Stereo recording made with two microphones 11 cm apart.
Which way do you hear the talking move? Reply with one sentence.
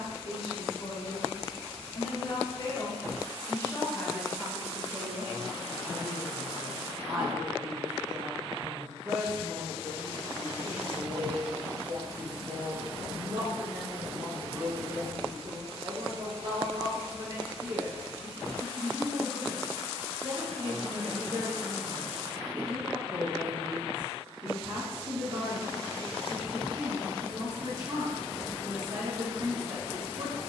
In this clip you hear the talking move to the right.